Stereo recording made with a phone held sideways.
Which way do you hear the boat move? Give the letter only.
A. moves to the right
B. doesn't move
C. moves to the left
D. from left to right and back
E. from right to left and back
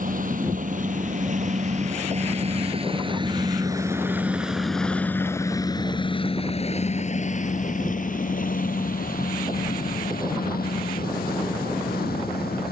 C.